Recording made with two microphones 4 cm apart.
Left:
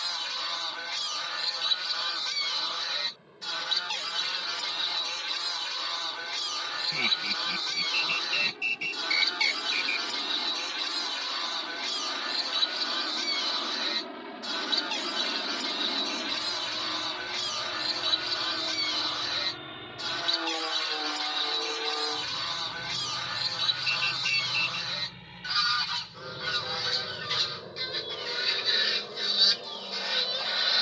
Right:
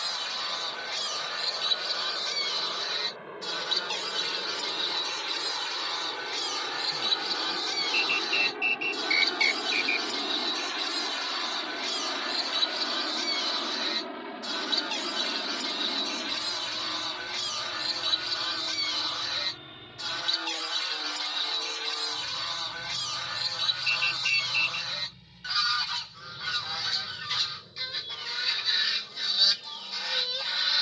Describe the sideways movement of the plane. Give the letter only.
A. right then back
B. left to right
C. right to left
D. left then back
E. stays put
C.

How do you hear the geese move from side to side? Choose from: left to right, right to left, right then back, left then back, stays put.
stays put.